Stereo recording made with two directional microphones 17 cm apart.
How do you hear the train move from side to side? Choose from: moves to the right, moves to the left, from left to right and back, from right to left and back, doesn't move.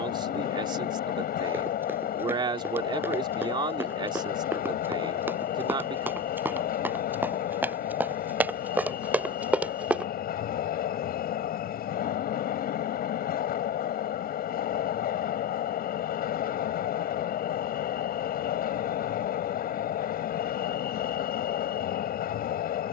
doesn't move.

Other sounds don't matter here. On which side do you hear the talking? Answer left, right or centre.
right.